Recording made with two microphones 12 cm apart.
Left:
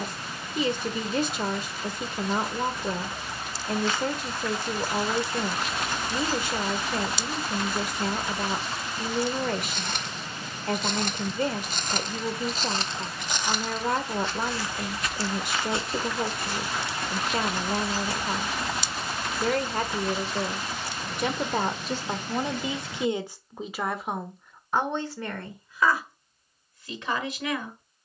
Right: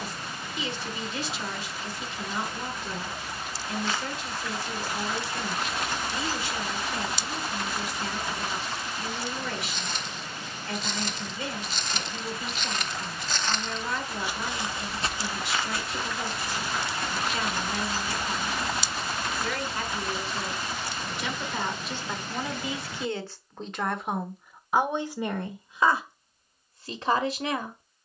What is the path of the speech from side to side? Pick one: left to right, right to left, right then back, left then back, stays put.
left to right.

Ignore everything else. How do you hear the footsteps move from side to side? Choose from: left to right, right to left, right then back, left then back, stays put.
right then back.